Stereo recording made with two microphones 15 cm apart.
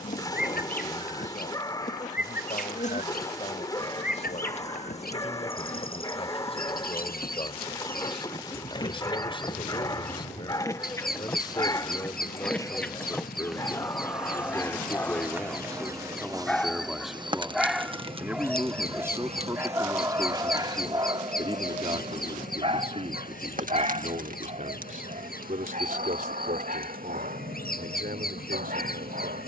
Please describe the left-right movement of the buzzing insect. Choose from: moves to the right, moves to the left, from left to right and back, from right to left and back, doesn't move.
moves to the right.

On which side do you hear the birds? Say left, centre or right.
left.